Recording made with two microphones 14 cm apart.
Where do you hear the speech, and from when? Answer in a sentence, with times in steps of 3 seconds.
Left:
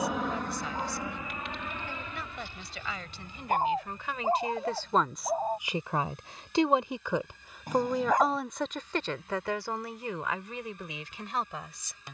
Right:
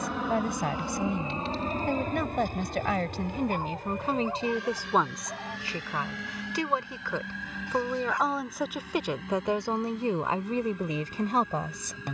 You can hear the speech on the right from 0 s, in the centre from 6 s and on the right from 9 s.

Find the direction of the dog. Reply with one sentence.
In this clip you hear the dog on the left.